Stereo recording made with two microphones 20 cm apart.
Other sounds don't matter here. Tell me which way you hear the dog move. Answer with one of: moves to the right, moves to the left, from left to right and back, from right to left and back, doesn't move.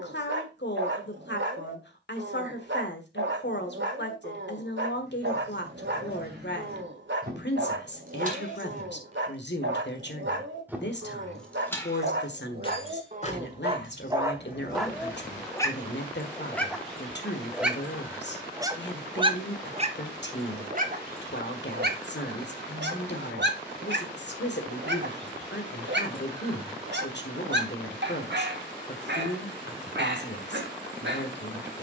from right to left and back.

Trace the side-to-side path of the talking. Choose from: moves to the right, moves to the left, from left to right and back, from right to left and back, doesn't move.
doesn't move.